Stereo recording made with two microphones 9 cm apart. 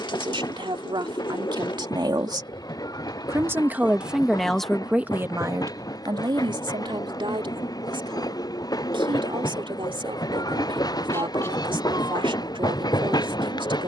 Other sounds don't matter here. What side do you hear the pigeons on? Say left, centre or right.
left.